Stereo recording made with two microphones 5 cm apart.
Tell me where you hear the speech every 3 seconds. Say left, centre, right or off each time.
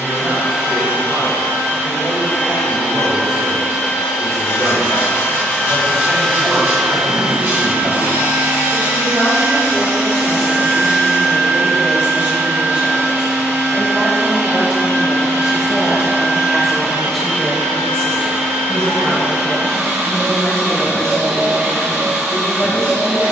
right, right, right, right, right, centre, left, left.